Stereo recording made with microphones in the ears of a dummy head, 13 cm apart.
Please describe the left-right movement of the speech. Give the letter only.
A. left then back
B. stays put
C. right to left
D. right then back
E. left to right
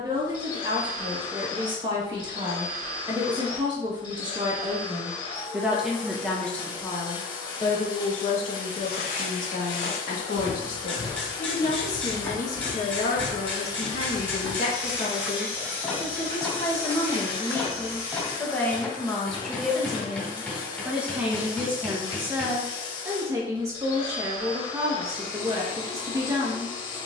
A.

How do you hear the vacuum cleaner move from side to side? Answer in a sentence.
In this clip you hear the vacuum cleaner stay put.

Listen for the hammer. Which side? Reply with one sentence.
In this clip you hear the hammer in the centre.